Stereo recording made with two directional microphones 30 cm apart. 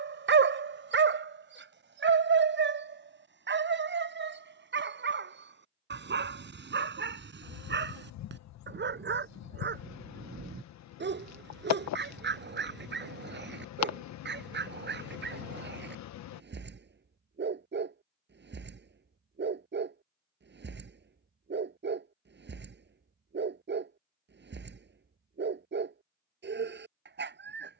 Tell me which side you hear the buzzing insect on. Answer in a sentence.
You can hear the buzzing insect on the left.